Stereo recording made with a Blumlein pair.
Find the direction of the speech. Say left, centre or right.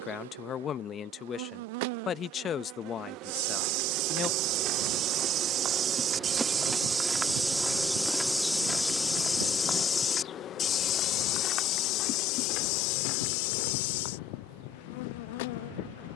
left.